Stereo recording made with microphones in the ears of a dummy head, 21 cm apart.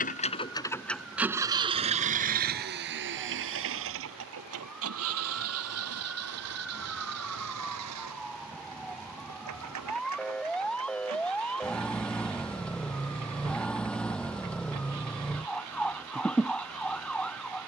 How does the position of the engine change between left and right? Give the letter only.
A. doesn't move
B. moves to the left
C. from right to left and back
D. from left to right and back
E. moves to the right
E.